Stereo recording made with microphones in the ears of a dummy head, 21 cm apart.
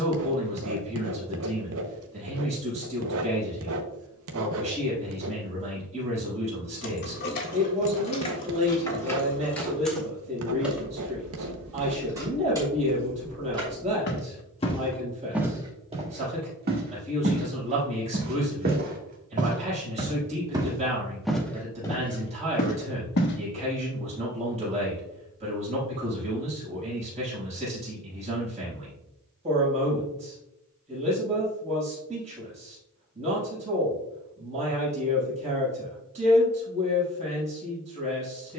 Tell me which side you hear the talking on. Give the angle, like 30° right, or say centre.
30° right.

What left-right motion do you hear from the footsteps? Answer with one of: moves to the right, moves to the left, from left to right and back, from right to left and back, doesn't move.
from left to right and back.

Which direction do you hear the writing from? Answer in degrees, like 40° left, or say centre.
60° right.